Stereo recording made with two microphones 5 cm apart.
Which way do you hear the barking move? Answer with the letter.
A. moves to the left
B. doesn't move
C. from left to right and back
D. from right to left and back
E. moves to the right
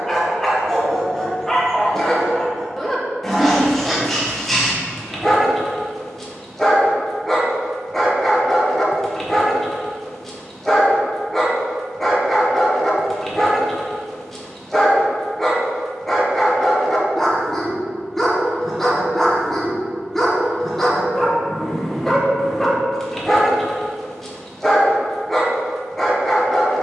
B.